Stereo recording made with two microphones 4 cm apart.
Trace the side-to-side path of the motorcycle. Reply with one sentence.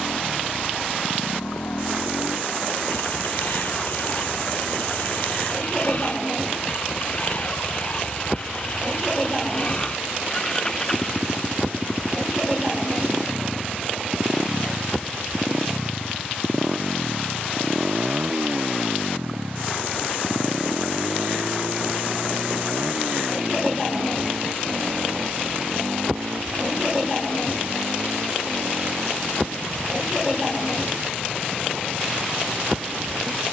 You can hear the motorcycle move to the right.